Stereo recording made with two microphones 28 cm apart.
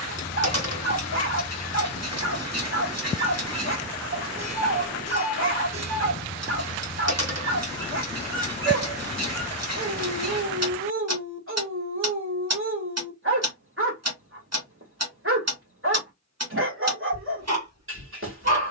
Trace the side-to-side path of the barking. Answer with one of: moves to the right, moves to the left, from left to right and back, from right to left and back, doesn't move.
doesn't move.